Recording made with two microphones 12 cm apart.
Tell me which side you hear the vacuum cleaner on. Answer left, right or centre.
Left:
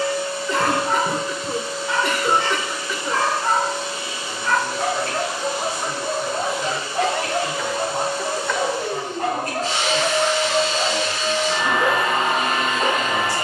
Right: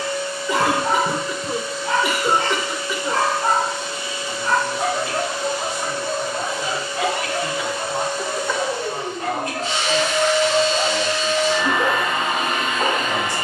left.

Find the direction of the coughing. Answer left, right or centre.
centre.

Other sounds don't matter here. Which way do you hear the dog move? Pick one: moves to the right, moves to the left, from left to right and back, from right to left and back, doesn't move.
from right to left and back.